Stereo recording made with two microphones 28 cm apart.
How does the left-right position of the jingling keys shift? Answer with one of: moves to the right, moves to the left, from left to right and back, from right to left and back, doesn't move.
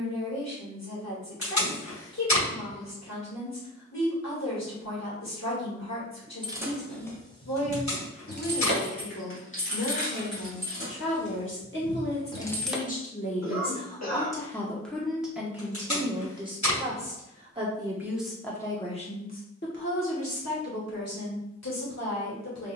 from right to left and back.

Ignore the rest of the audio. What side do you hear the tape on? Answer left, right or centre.
left.